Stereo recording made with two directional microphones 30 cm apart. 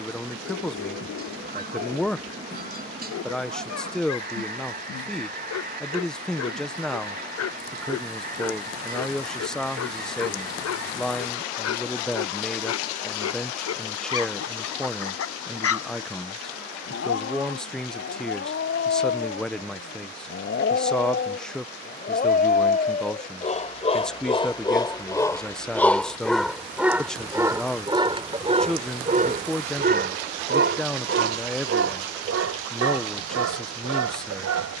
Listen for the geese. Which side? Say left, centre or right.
right.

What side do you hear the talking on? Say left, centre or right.
centre.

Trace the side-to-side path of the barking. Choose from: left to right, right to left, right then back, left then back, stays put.
left to right.